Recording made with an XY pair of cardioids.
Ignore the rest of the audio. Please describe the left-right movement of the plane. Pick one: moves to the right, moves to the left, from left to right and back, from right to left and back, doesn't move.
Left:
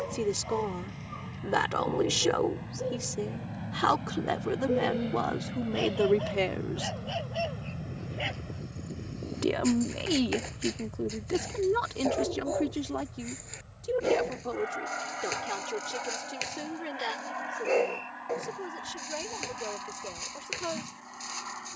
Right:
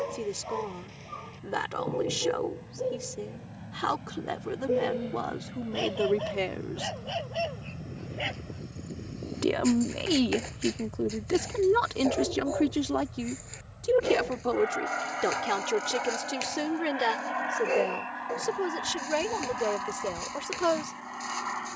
moves to the right.